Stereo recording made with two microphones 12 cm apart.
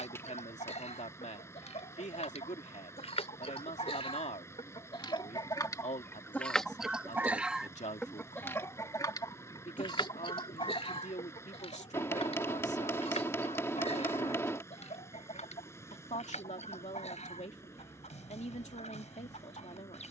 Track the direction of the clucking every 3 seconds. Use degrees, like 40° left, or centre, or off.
70° left, 50° left, 10° left, 50° left, 60° left, 70° left, 70° left.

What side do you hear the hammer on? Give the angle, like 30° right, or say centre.
20° left.